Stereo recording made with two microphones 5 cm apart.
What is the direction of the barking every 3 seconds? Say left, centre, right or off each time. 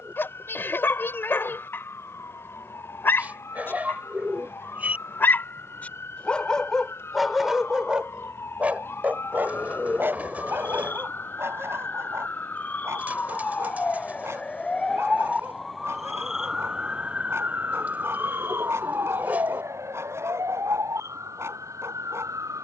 left, left, centre, right, right, right, right, right.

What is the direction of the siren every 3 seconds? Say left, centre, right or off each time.
left, left, left, left, left, centre, right, right.